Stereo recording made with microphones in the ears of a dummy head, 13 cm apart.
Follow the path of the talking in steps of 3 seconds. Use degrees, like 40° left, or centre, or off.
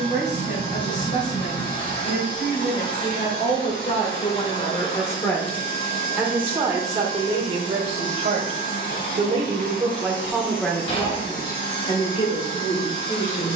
60° left, 40° left, 30° right, centre, 50° left.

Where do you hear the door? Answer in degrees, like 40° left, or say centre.
40° left.